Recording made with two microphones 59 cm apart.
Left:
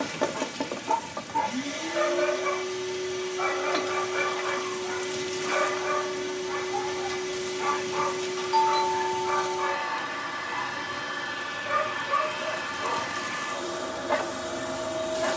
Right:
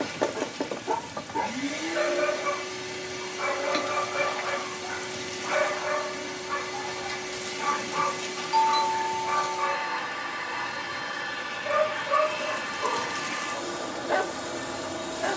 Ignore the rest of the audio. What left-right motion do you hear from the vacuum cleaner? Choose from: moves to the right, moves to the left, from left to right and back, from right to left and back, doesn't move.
doesn't move.